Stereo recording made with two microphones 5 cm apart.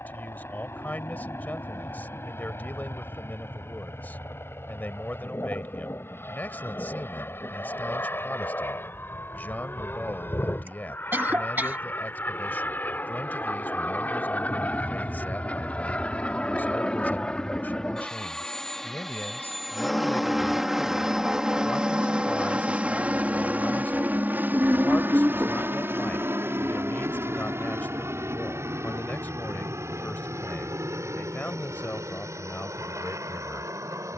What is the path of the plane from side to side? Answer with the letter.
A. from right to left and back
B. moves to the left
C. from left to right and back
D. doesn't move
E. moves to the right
E.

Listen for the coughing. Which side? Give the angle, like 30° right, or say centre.
40° right.